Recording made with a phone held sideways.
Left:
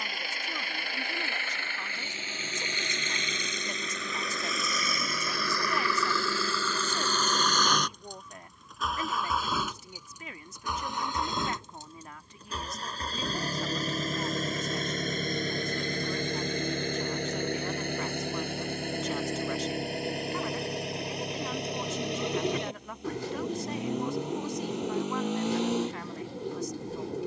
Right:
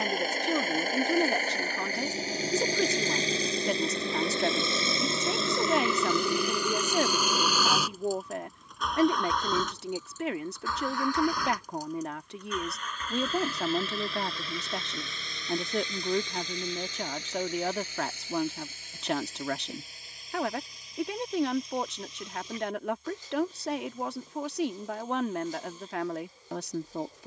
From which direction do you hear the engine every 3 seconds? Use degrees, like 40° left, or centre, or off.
40° right, 30° right, 10° right, 20° left, 40° left, 50° left, 70° left, 70° left, 80° left.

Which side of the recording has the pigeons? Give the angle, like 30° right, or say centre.
70° left.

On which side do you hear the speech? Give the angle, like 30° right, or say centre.
70° right.